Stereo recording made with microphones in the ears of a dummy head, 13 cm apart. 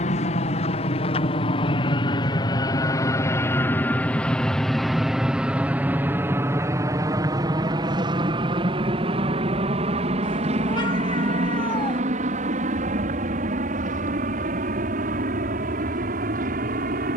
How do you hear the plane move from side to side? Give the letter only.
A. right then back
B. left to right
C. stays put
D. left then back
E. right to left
B.